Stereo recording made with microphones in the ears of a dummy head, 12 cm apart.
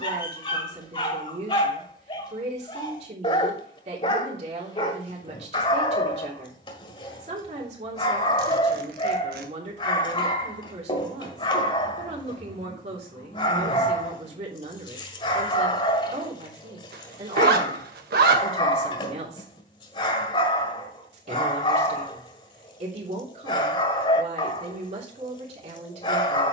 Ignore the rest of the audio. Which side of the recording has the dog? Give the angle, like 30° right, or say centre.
40° left.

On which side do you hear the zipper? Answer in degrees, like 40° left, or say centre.
80° right.